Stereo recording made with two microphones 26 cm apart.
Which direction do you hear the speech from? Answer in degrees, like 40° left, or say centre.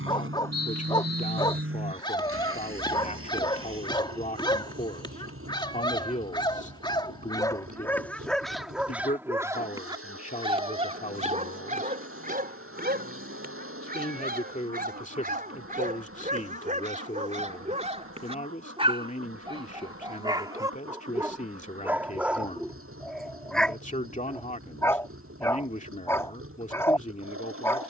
30° left.